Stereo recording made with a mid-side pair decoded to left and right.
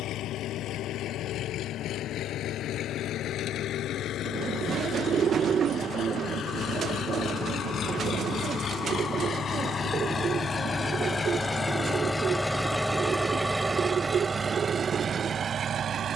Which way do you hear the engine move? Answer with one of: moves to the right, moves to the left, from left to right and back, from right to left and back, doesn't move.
moves to the right.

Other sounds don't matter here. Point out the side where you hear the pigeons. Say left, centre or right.
right.